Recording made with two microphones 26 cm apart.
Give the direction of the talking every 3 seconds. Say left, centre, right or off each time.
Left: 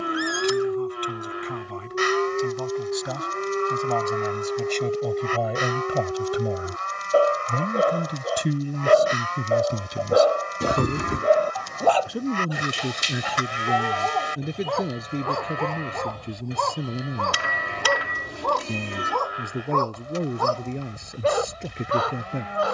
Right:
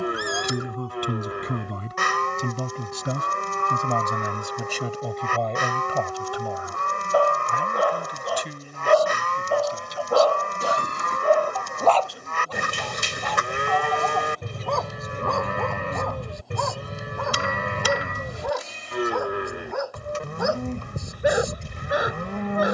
right, centre, left, left, left, left, left, left.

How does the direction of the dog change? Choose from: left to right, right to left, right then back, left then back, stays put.
left to right.